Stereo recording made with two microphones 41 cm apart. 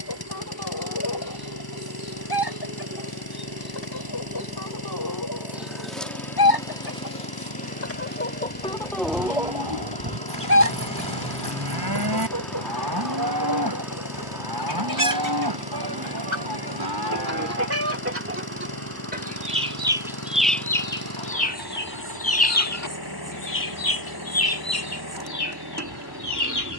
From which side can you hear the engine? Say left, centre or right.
left.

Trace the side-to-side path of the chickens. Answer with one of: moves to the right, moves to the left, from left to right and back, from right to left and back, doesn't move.
from left to right and back.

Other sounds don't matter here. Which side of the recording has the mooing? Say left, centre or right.
right.